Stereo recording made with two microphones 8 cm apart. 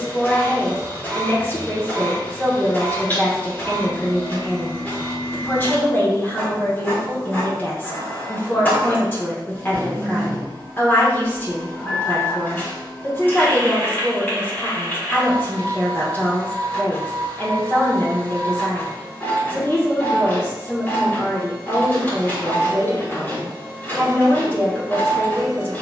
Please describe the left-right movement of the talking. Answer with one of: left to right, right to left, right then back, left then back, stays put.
stays put.